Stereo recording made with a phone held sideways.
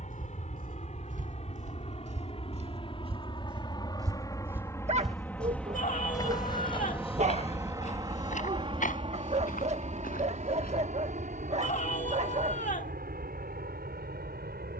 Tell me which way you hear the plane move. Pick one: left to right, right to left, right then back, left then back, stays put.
left to right.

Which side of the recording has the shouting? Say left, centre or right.
left.